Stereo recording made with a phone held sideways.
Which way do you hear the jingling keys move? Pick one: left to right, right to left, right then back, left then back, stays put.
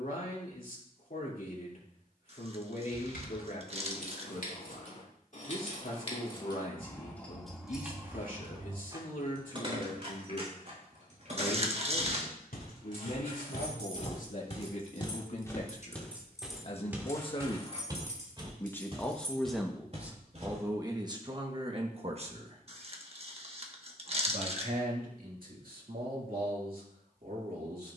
right then back.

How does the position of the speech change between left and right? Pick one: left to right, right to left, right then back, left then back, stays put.
left to right.